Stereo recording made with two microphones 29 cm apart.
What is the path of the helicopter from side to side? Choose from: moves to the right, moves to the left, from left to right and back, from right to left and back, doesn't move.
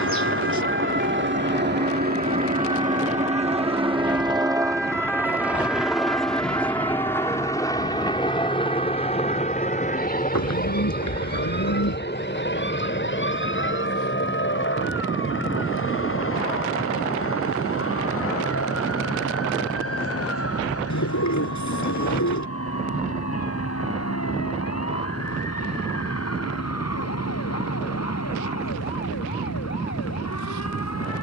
moves to the left.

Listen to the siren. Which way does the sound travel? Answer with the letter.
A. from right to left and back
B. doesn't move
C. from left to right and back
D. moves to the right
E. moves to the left
E.